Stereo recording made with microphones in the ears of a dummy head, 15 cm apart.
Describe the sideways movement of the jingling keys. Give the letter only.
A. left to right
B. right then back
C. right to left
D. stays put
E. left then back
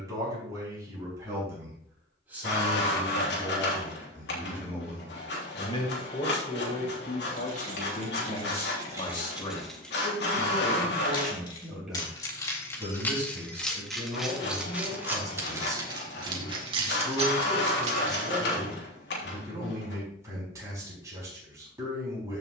E.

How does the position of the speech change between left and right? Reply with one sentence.
In this clip you hear the speech go left and come back.